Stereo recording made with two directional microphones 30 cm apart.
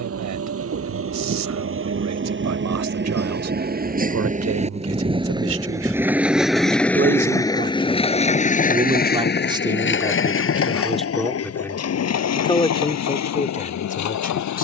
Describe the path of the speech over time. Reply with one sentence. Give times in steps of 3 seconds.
In this clip you hear the speech on the right from 0 s, in the centre from 9 s and on the left from 12 s.